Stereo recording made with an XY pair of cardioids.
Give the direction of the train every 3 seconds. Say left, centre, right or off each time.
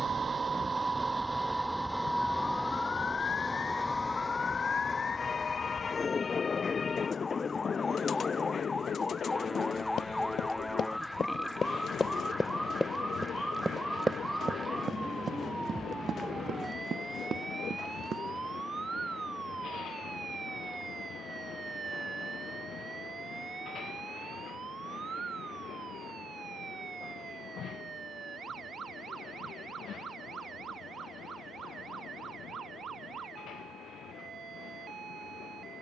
centre, left, left, left, left, left, left, left, left, left, left, left.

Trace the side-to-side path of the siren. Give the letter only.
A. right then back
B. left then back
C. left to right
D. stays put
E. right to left
C.